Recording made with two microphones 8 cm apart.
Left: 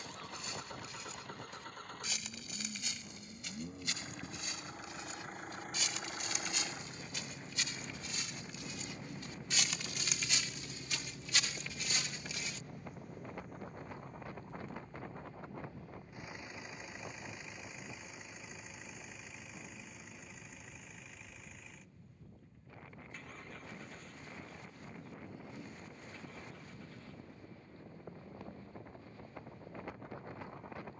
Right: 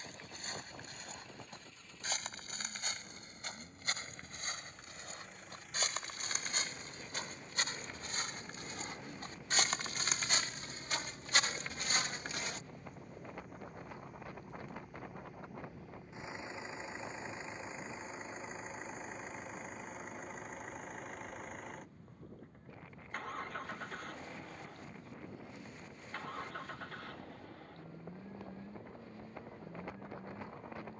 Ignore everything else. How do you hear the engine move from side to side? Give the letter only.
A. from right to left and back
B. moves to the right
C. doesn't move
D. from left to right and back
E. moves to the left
B.